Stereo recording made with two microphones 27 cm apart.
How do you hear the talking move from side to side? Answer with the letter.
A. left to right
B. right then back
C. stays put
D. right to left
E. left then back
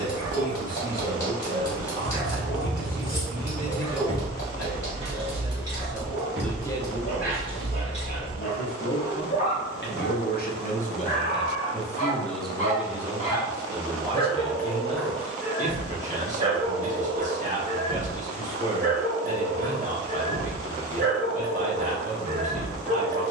E.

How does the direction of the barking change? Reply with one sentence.
In this clip you hear the barking move from left to right.